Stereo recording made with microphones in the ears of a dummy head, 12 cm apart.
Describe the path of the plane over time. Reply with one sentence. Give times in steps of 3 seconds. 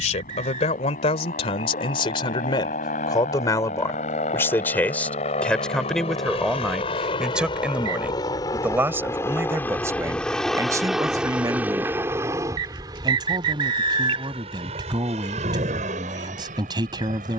You can hear the plane on the left from 0 s, in the centre from 9 s and on the right from 12 s.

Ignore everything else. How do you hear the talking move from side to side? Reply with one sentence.
You can hear the talking travel towards the right.